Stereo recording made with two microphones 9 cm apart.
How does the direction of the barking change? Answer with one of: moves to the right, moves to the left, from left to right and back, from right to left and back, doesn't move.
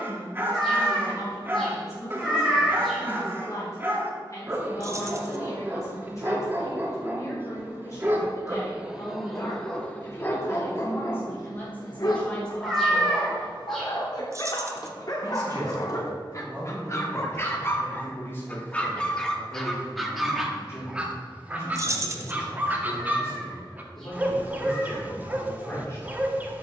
from right to left and back.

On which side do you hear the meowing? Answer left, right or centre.
centre.